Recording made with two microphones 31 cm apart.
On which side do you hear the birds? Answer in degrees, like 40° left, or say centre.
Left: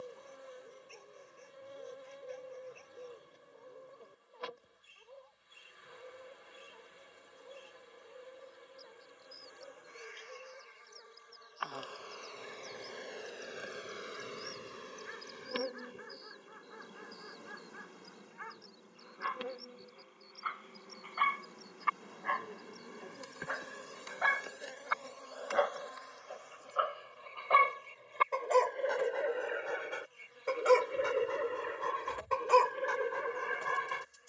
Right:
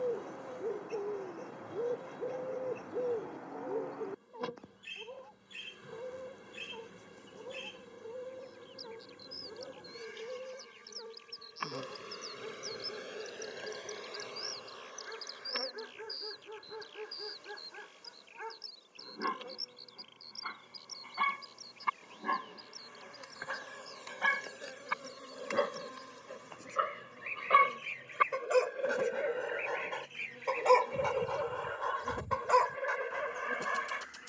80° right.